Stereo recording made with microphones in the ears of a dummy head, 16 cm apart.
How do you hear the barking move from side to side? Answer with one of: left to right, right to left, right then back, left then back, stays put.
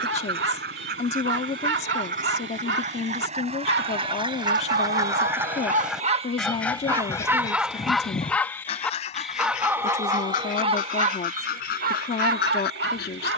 left then back.